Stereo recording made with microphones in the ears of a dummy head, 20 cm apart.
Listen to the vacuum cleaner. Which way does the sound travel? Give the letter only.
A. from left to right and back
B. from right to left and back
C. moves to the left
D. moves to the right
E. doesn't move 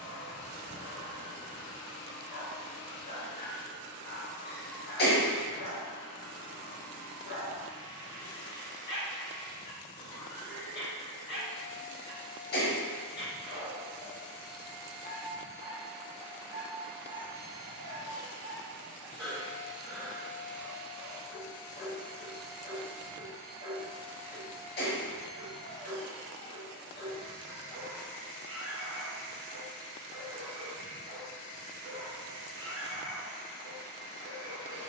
A.